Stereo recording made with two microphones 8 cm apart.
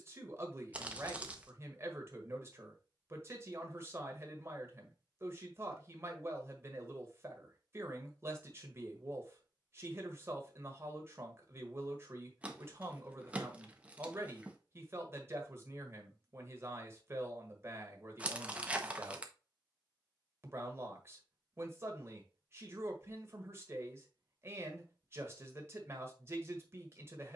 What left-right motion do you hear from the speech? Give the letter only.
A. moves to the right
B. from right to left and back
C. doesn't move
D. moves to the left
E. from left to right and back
C.